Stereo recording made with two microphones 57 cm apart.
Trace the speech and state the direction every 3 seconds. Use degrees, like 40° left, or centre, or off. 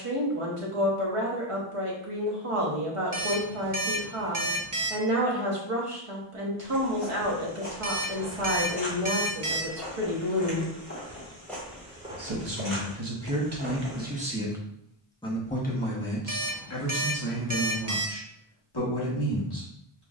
60° right, 60° right, 60° right, 60° right, 30° right, 30° left, 40° left.